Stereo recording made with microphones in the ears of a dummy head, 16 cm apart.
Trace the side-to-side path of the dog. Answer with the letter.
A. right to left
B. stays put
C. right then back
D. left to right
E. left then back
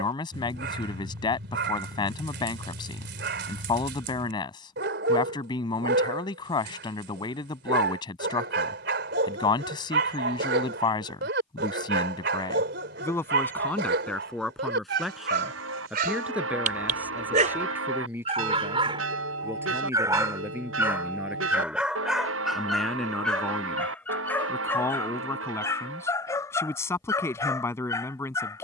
A.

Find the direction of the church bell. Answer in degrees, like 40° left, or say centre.
80° right.